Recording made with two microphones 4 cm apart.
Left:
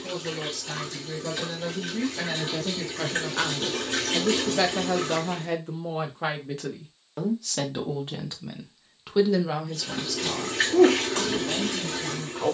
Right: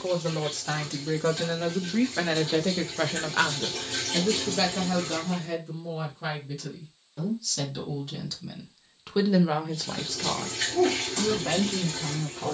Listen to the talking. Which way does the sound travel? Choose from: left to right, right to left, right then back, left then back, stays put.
left then back.